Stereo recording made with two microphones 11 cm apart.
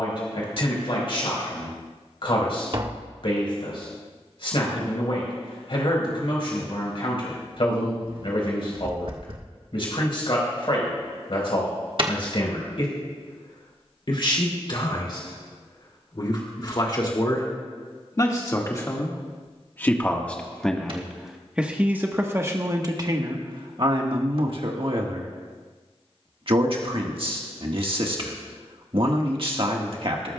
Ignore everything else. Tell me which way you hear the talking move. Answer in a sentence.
You can hear the talking go from the left side to the right.